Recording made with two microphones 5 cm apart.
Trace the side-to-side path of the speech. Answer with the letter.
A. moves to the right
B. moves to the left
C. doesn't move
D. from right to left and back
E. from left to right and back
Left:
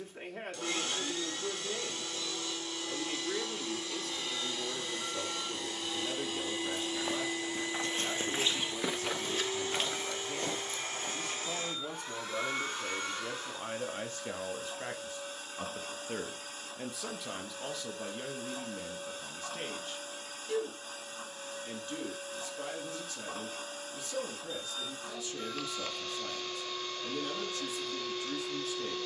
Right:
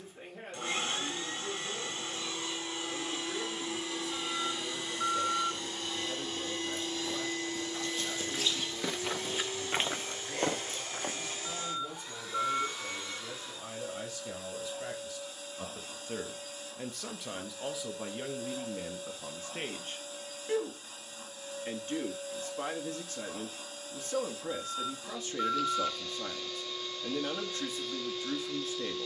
A.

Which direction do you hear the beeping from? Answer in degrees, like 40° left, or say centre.
50° right.